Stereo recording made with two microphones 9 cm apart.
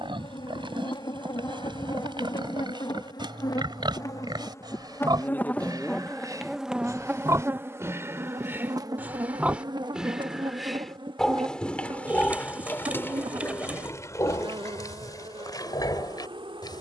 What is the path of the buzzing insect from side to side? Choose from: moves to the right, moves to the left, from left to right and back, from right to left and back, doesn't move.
moves to the right.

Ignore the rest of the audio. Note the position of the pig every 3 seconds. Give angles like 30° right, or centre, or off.
60° right, 50° right, 30° right, centre, 30° left, 50° left.